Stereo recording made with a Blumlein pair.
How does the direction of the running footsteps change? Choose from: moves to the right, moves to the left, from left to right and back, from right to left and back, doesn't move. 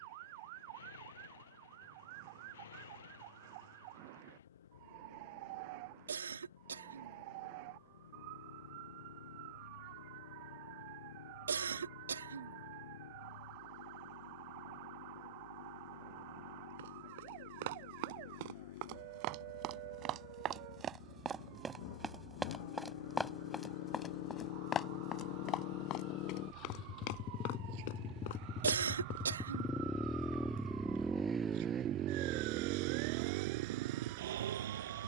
moves to the left.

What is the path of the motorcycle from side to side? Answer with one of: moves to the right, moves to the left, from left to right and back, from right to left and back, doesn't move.
moves to the right.